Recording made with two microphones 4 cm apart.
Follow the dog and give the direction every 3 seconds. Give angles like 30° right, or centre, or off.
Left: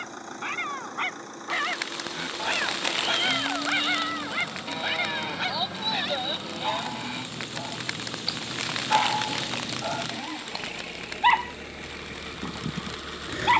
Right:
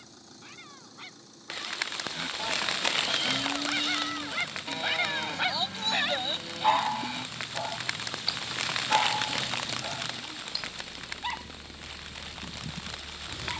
60° left, 20° left, 20° right, 40° left, 70° left.